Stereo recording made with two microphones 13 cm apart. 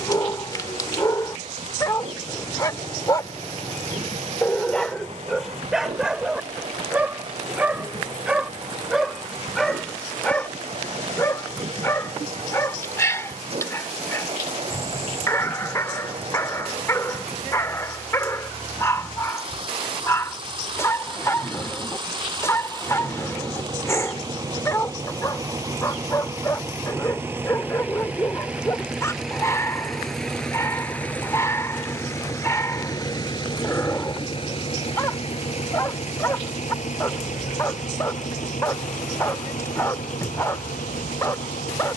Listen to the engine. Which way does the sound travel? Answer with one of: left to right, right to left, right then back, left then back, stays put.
right to left.